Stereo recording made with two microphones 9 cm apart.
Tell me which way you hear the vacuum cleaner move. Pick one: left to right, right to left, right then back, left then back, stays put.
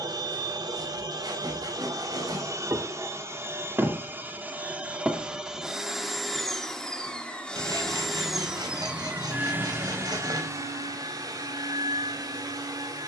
left then back.